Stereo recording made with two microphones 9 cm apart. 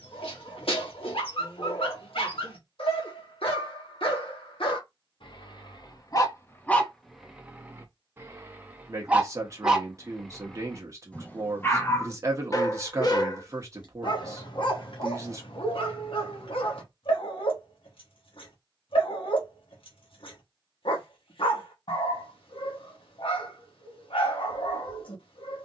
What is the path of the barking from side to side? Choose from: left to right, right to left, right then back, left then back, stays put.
right then back.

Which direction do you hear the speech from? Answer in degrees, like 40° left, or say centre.
30° right.